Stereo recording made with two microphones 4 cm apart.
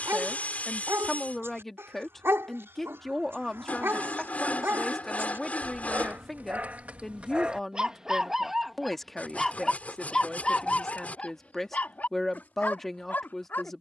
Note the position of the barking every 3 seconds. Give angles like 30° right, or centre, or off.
70° right, 60° right, 20° right, 30° left, 50° left.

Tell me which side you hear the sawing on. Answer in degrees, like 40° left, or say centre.
40° left.